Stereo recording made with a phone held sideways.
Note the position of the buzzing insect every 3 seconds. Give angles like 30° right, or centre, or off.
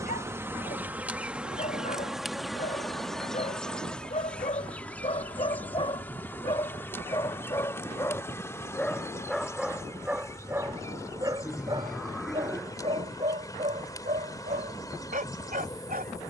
10° right, 10° left, 10° left, 20° left, 20° left, 20° left.